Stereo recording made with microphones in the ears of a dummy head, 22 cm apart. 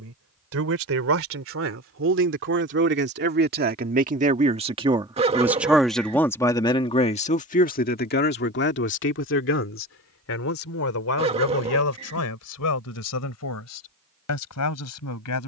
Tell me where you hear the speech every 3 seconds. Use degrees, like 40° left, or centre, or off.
60° right, 30° right, 30° left, 60° left, 70° left.